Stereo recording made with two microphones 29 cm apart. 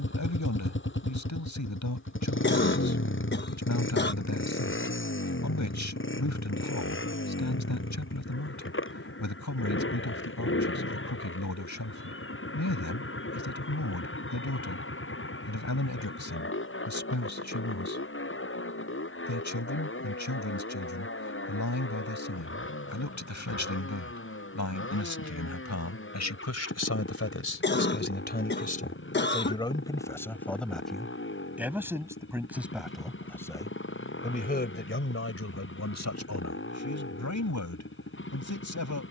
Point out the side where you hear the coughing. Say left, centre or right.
left.